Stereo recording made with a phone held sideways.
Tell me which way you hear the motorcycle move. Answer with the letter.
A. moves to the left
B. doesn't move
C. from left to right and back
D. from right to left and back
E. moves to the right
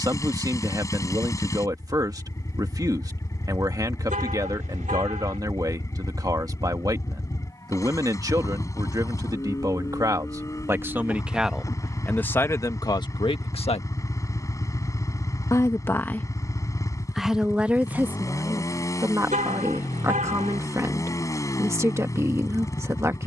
B.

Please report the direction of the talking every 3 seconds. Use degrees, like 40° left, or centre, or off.
20° right, 20° right, 20° right, 20° right, 30° left, centre, 20° right, 20° right.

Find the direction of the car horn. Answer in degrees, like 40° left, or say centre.
60° right.